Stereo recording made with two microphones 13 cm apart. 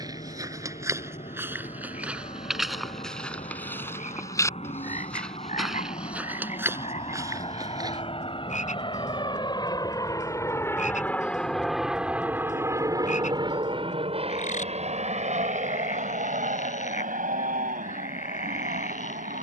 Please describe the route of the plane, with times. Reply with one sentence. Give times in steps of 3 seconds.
In this clip you hear the plane on the left from 0 s and on the right from 12 s.